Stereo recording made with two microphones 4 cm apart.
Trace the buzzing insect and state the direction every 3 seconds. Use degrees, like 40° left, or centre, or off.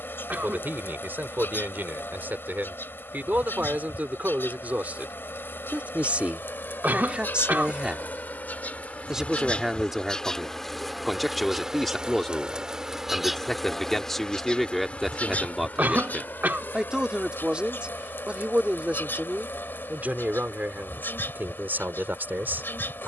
70° left, 70° left, 60° left, 10° left, centre, 60° left, 70° left, 70° left.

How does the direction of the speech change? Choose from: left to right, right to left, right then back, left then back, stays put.
left then back.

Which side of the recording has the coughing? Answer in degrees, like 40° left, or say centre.
50° right.